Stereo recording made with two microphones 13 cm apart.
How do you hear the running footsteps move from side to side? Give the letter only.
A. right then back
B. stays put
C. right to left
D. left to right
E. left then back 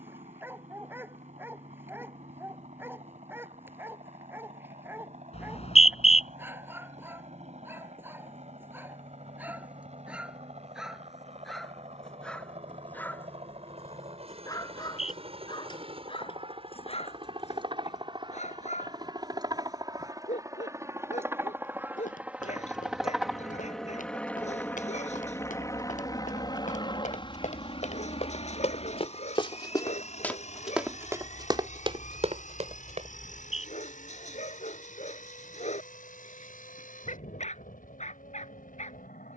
D.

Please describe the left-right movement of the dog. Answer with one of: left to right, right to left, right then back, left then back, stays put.
right to left.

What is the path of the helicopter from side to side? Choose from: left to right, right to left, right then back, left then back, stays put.
right to left.